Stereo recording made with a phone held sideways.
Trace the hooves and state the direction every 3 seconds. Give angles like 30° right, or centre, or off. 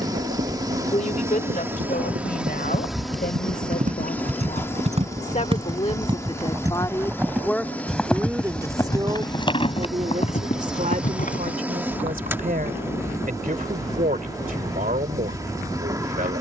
60° right, 40° right, centre, 40° left, off, off.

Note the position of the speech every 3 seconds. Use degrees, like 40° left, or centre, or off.
60° left, 50° left, 10° left, 50° right, 60° right, 60° right.